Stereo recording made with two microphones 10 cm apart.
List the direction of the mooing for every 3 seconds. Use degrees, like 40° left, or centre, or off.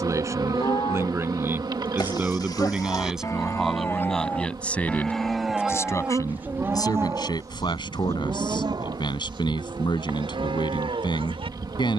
50° left, 20° left, 30° right, 60° right.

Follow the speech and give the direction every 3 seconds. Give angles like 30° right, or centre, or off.
20° right, 10° left, 50° left, 50° left.